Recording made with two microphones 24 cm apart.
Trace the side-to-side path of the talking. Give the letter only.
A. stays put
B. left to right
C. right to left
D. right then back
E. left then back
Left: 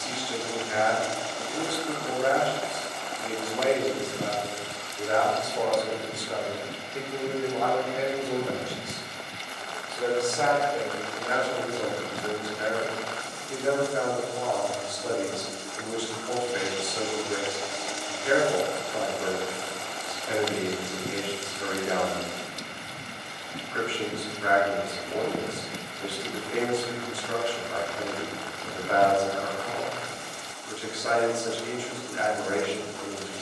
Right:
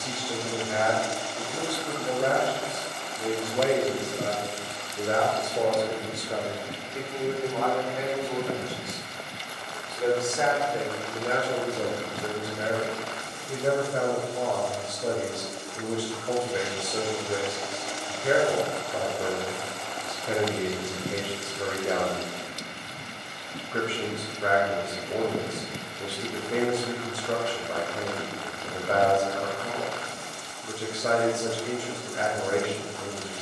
E.